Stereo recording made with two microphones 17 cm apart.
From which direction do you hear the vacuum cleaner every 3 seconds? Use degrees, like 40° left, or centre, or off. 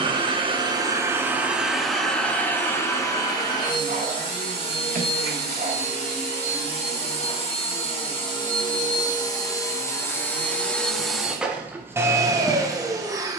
10° right, 30° left, 30° left, 10° left, 20° right.